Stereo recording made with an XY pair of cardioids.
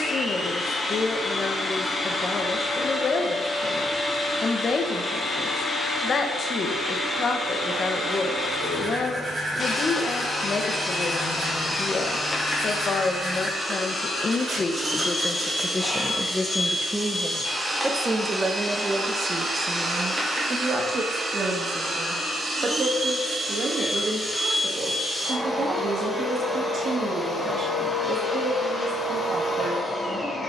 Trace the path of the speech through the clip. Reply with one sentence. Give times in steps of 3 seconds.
In this clip you hear the speech on the left from 0 s, in the centre from 15 s and on the right from 18 s.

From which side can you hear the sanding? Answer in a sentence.
In this clip you hear the sanding on the right.